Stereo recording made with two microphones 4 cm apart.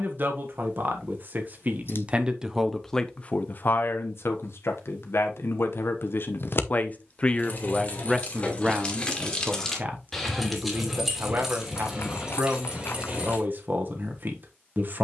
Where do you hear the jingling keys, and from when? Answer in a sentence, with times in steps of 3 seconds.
You can hear the jingling keys not at all from 0 s, on the left from 6 s, in the centre from 9 s and on the right from 12 s.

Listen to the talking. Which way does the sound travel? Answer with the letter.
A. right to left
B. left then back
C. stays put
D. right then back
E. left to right
B.